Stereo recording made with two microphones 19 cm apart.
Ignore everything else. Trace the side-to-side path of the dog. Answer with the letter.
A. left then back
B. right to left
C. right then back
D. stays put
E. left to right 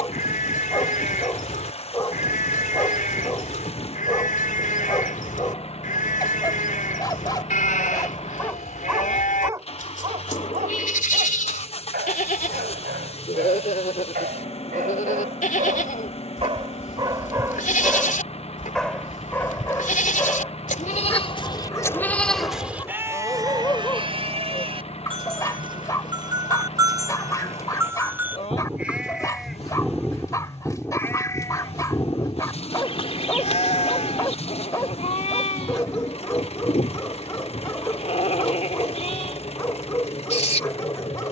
C.